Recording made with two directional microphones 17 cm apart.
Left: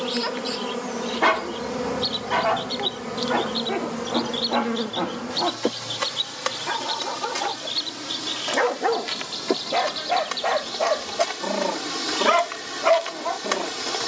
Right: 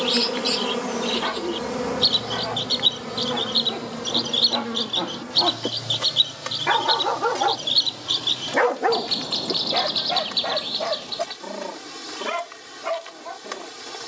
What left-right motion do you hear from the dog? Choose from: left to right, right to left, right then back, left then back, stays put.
right then back.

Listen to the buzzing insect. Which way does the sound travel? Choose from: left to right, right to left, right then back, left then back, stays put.
right to left.